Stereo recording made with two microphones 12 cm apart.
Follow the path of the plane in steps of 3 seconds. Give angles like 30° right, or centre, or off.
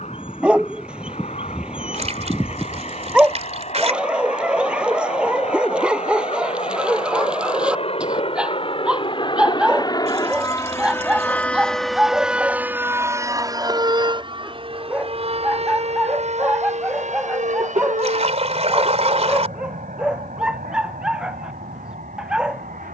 80° left, 70° left, 60° left, 30° left, 30° right, 60° right, 70° right, 70° right.